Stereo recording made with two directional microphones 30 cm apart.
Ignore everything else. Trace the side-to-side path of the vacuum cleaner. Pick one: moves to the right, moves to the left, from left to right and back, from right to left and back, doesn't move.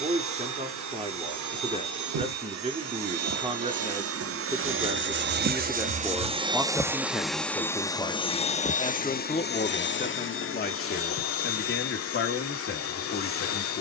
moves to the left.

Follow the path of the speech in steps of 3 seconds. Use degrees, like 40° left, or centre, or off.
20° right, 10° right, 10° left, 30° left, 40° left.